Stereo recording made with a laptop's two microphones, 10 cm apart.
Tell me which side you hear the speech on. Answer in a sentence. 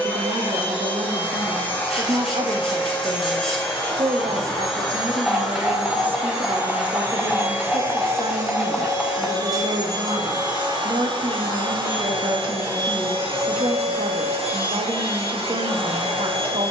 In this clip you hear the speech on the right.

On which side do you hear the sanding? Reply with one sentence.
You can hear the sanding in the centre.